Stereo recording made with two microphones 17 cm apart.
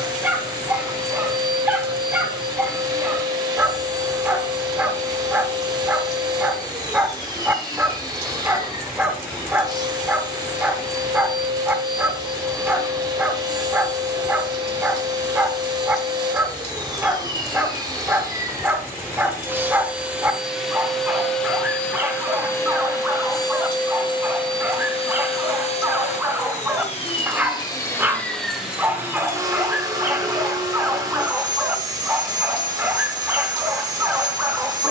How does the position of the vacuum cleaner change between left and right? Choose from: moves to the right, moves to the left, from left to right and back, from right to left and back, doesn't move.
from right to left and back.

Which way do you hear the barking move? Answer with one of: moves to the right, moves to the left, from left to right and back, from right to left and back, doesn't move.
doesn't move.